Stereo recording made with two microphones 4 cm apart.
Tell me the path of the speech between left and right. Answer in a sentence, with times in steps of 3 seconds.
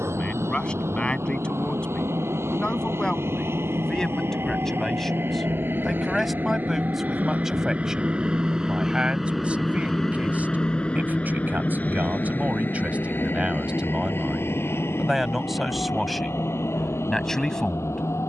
In this clip you hear the speech on the left from 0 s, in the centre from 3 s, on the right from 9 s and in the centre from 15 s.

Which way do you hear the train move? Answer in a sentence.
In this clip you hear the train travel towards the left.